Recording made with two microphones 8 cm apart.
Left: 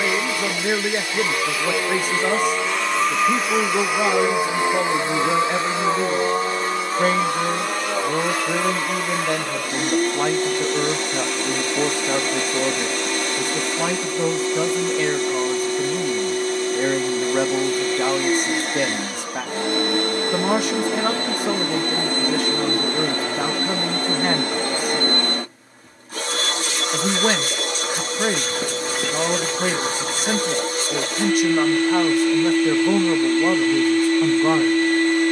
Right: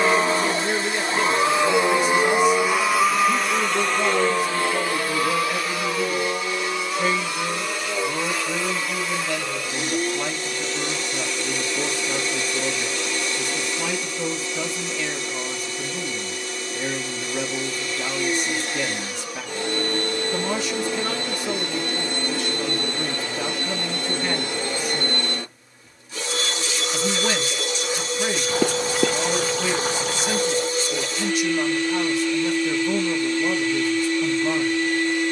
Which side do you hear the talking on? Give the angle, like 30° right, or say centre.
50° left.